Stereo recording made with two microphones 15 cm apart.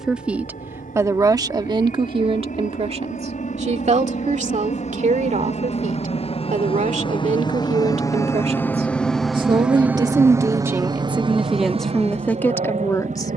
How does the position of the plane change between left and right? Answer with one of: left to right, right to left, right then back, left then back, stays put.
left to right.